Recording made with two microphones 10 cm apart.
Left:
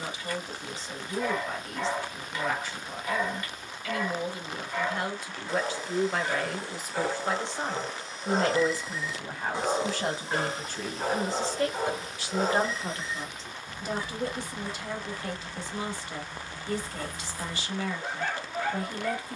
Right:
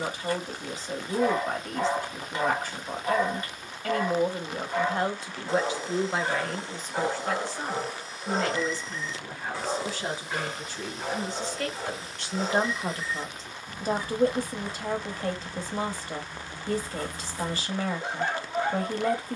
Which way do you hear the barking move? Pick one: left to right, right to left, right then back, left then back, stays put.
left then back.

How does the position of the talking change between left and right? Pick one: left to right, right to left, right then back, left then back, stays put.
left then back.